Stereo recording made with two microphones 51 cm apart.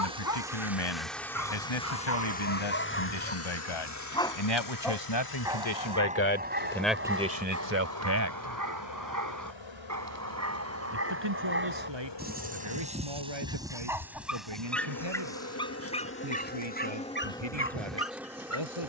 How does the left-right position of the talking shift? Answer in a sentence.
You can hear the talking move to the right.